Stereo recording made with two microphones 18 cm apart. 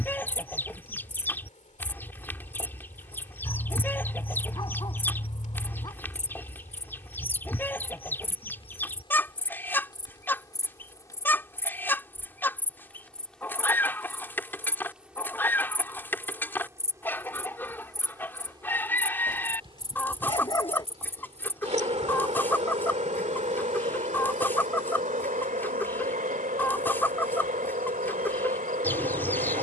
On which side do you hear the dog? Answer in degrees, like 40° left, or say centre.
20° left.